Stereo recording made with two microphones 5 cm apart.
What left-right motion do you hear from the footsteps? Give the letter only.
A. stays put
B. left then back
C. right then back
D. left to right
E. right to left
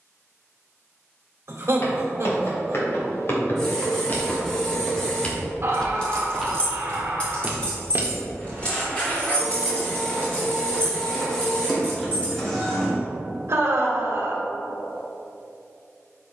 D.